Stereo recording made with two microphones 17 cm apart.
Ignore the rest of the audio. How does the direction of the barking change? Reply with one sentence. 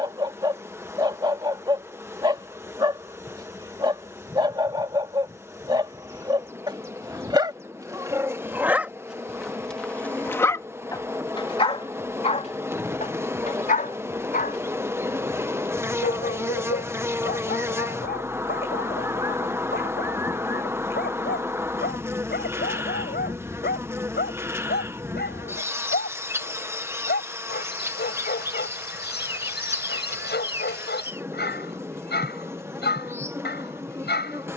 You can hear the barking travel towards the left.